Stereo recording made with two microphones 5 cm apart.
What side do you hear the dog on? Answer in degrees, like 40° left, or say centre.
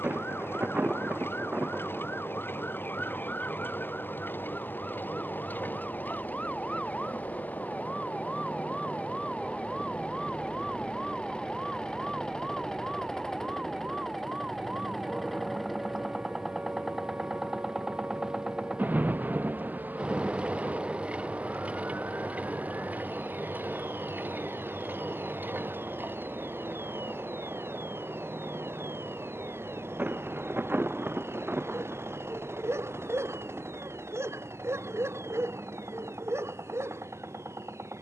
70° right.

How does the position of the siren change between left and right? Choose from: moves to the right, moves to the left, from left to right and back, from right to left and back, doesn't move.
moves to the right.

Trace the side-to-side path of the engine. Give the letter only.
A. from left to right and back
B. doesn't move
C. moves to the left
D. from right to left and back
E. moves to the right
E.